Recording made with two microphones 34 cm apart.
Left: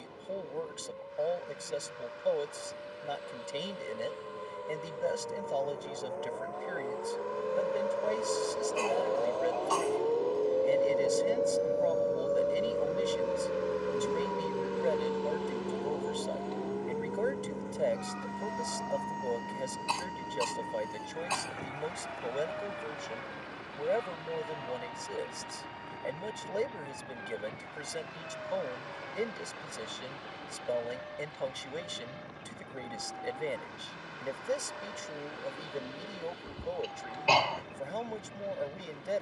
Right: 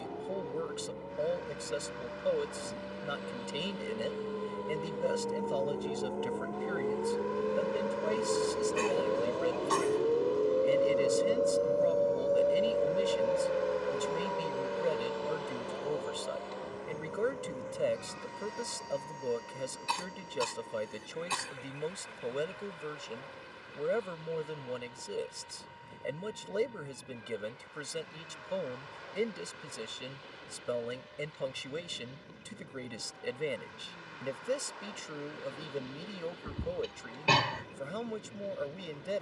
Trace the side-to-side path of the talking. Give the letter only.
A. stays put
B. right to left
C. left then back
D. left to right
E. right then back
A.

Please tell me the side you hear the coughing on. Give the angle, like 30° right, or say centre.
30° right.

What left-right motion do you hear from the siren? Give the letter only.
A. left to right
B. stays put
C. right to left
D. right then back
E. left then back
C.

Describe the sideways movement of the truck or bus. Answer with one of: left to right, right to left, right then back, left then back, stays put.
right to left.